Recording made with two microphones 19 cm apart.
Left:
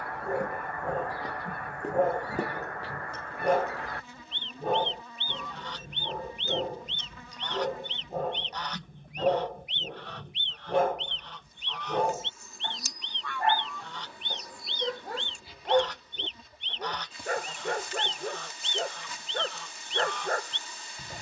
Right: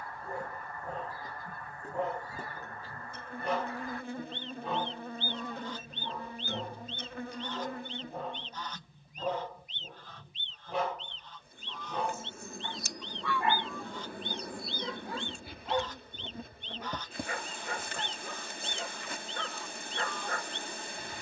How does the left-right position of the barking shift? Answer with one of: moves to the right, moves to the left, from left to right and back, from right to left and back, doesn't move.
doesn't move.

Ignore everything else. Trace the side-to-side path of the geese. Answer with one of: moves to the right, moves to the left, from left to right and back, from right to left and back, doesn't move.
doesn't move.